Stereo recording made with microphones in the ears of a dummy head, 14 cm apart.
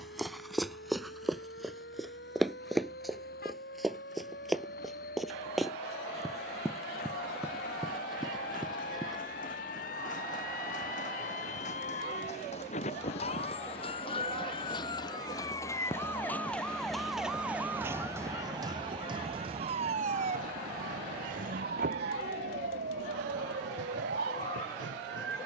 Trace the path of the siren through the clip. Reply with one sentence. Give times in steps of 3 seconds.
You can hear the siren on the left from 0 s, in the centre from 15 s and on the right from 18 s.